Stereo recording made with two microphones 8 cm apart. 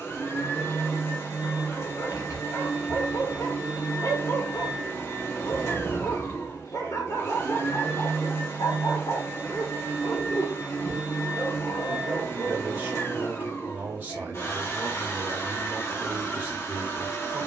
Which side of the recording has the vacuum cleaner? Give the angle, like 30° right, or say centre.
40° left.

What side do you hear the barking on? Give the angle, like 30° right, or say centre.
50° left.